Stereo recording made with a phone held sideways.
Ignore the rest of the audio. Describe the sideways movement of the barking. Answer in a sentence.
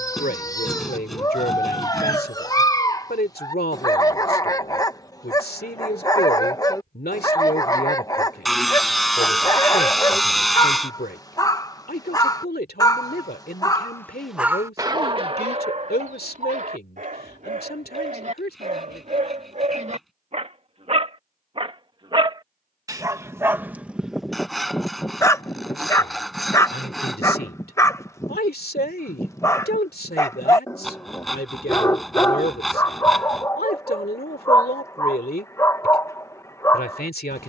In this clip you hear the barking move from left to right and back again.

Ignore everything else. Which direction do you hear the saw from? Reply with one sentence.
You can hear the saw in the centre.